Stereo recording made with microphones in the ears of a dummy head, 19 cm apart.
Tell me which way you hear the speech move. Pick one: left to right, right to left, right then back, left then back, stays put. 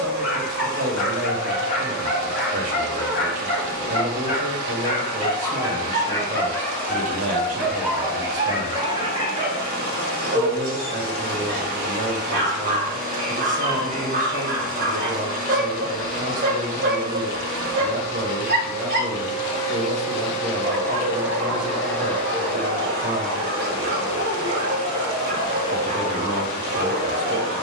stays put.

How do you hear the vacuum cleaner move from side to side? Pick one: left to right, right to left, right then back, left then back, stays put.
right to left.